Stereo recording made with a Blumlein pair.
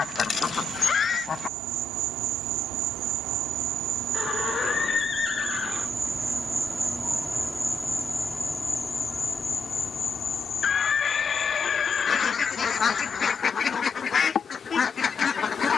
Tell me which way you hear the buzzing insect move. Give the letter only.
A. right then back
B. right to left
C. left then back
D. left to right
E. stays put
B.